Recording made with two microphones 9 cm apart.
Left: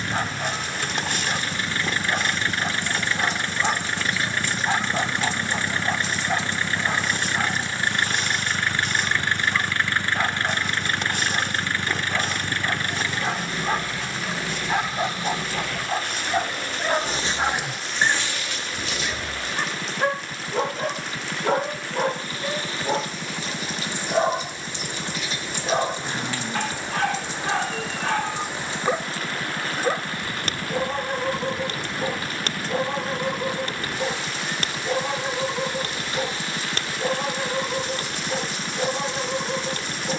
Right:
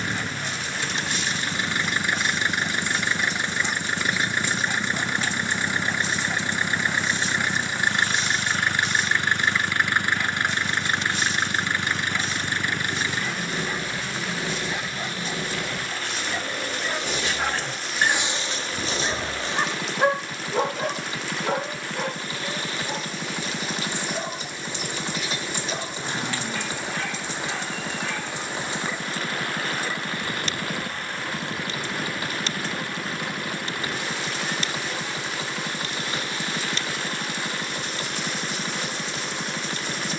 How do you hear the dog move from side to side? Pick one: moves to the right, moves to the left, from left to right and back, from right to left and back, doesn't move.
from left to right and back.